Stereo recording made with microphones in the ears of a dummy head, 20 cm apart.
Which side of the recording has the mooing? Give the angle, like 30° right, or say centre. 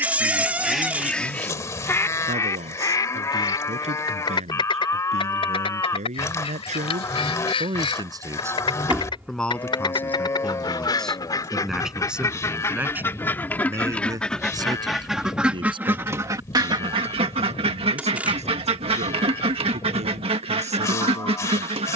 10° left.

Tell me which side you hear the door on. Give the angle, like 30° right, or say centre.
10° right.